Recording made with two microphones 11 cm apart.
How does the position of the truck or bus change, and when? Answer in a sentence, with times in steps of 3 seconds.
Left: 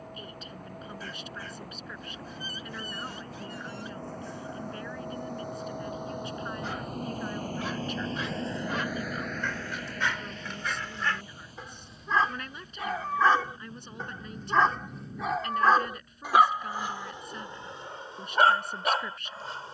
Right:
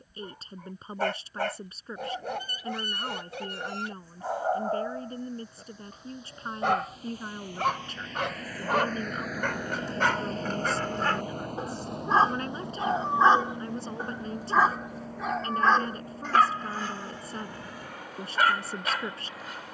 In this clip you hear the truck or bus on the left from 0 s and on the right from 9 s.